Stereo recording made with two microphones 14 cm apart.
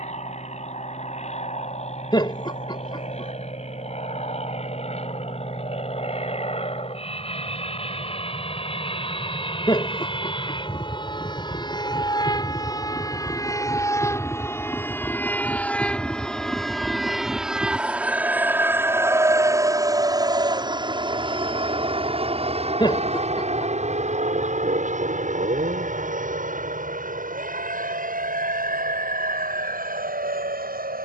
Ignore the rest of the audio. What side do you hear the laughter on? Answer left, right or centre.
left.